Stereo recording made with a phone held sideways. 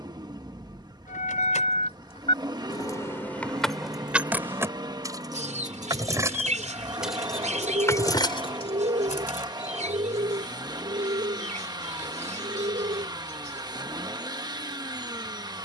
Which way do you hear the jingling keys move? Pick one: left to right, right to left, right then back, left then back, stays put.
right then back.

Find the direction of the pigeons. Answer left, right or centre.
right.